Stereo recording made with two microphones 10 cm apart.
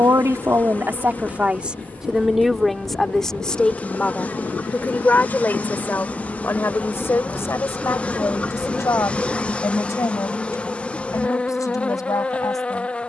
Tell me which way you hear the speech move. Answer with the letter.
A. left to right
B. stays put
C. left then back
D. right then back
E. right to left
E.